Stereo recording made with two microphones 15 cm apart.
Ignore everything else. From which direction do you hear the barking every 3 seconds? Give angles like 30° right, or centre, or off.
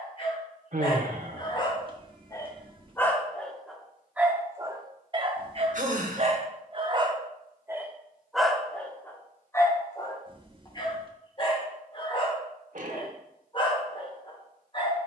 30° left, 10° right, 20° right, 30° left, 30° left.